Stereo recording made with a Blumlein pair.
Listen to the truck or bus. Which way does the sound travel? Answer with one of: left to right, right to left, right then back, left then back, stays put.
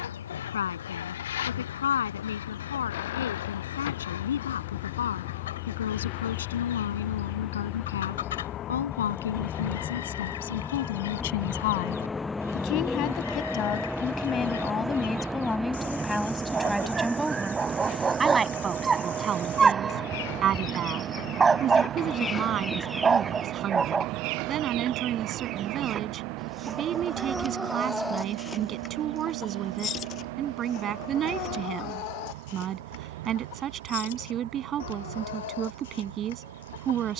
left to right.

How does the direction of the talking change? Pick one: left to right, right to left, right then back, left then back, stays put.
left to right.